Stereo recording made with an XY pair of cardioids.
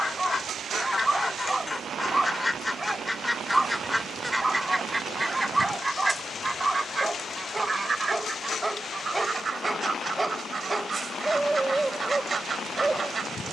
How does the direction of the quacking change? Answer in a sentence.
In this clip you hear the quacking move from left to right.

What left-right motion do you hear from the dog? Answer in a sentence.
In this clip you hear the dog stay put.